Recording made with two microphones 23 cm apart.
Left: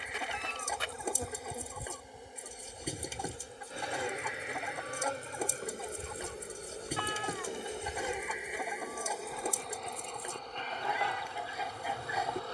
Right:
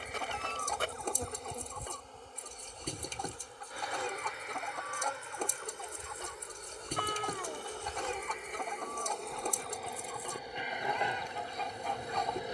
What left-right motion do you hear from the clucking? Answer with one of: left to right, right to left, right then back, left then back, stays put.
stays put.